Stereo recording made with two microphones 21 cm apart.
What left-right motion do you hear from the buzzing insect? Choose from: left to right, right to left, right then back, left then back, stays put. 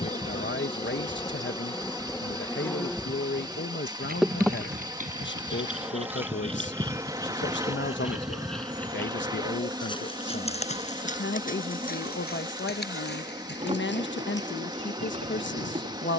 left to right.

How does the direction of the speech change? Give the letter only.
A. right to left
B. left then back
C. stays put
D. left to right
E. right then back
C.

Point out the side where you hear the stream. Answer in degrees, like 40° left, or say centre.
20° right.